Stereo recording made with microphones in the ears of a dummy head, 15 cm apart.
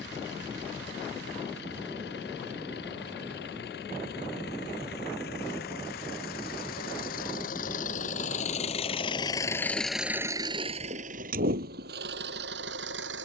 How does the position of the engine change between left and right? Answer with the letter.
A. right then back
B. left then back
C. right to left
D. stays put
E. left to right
E.